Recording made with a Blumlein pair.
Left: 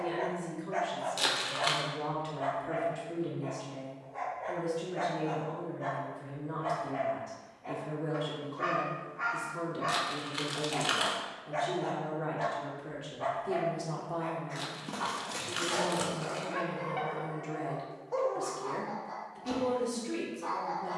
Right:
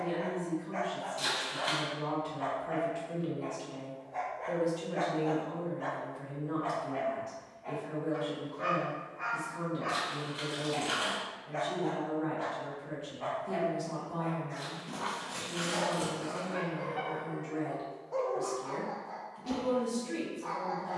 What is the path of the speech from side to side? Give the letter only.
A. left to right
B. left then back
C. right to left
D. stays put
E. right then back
E.